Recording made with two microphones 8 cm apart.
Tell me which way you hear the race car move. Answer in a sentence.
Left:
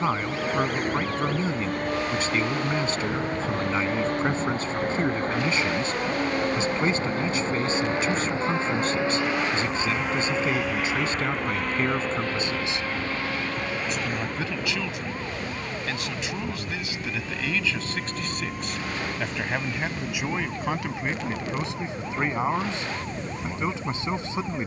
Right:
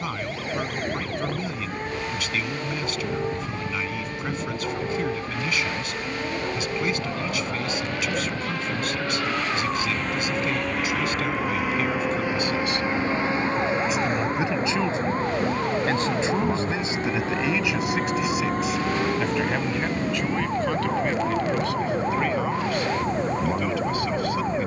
You can hear the race car move from left to right.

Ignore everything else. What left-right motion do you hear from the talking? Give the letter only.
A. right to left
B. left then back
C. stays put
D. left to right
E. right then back
E.